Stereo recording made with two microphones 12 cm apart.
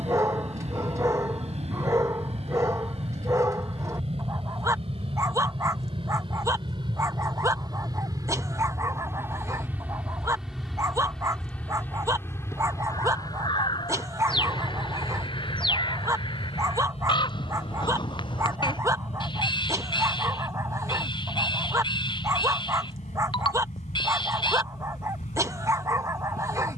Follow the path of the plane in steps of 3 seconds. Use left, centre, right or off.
right, right, right, centre, left, left, left, left, left.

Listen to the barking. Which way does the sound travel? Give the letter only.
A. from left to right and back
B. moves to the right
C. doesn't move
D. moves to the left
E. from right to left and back
C.